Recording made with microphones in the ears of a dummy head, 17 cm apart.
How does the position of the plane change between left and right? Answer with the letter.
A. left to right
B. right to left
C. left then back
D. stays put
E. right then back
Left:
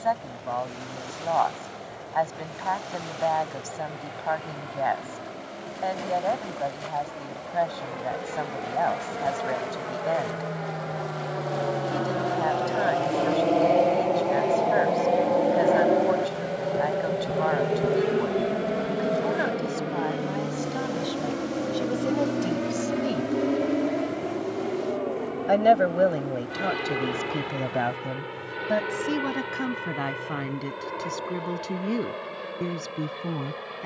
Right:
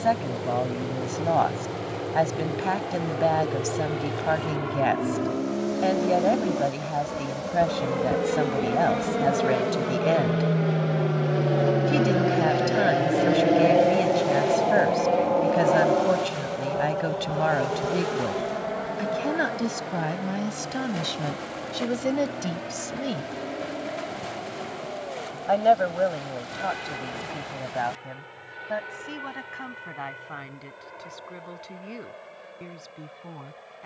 B.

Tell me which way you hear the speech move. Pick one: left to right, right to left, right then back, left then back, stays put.
right to left.